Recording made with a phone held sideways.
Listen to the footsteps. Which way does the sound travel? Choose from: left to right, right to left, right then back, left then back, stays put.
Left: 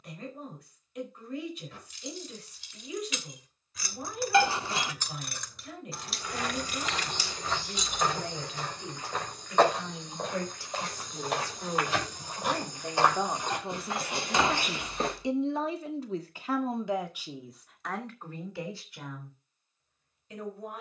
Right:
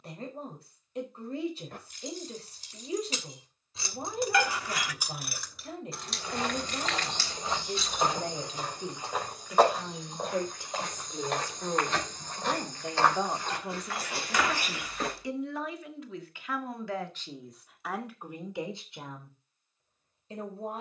right to left.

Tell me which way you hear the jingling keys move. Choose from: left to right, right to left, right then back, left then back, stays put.
right to left.